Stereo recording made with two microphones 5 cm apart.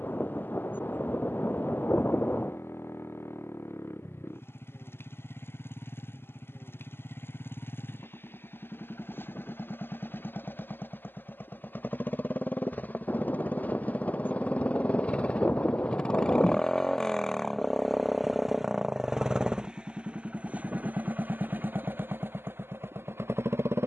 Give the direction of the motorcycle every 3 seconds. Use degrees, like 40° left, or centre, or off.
60° left, 50° left, 50° left, 40° left, 30° left, 10° left, 20° right, 50° right.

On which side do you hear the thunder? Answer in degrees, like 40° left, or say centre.
40° left.